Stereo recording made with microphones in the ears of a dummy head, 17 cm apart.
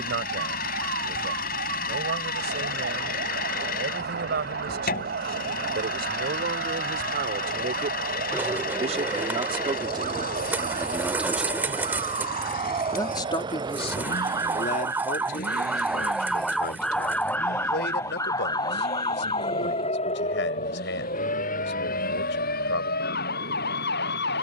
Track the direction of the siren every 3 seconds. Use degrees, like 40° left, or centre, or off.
60° right, 60° right, 50° right, 40° right, 30° right, centre, 30° left, 50° left.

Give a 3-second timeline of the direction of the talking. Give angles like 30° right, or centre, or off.
60° right, 60° right, 50° right, 20° right, 30° left, 60° left, 70° left, 70° left.